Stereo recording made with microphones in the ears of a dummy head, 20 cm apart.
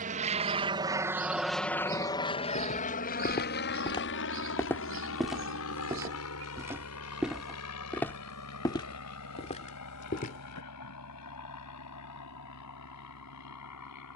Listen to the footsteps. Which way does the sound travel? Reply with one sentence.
You can hear the footsteps move from left to right and back again.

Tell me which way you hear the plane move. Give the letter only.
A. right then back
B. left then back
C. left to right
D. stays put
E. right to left
E.